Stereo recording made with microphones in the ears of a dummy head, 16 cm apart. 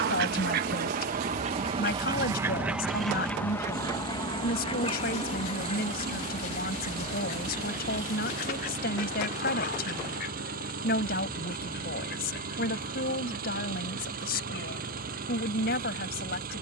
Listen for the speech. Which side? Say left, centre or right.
left.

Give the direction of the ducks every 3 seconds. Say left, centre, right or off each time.
right, left, left, left, left, left.